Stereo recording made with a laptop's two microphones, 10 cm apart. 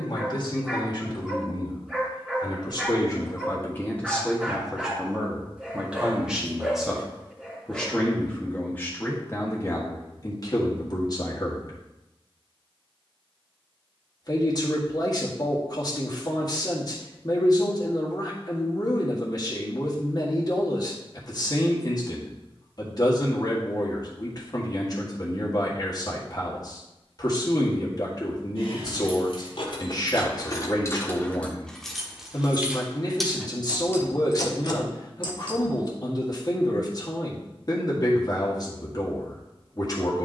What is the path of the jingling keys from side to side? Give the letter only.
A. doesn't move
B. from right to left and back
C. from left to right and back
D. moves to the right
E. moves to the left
C.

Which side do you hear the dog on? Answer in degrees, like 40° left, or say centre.
10° right.